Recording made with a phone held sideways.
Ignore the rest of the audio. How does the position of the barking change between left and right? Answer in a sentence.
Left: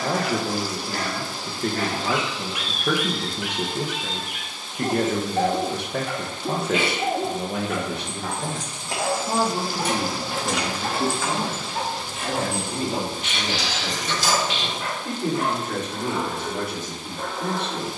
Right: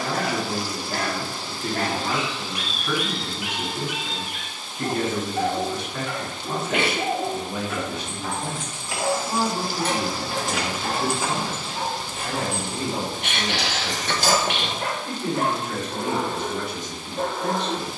You can hear the barking move from right to left and back again.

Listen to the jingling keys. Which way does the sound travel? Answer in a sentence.
You can hear the jingling keys travel towards the right.